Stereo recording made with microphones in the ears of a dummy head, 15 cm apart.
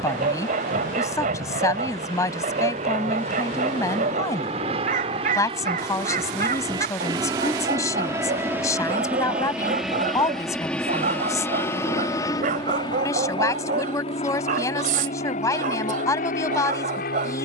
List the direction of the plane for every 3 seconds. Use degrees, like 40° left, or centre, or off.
50° right, 40° right, 20° right, centre, 30° left, 50° left.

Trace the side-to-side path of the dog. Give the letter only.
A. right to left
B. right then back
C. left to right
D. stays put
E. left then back
D.